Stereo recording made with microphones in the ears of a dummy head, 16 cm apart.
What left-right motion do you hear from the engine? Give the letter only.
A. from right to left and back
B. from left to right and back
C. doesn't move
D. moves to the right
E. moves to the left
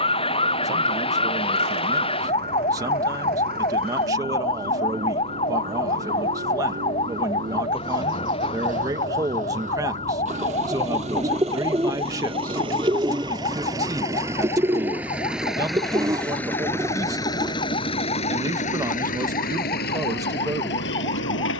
E.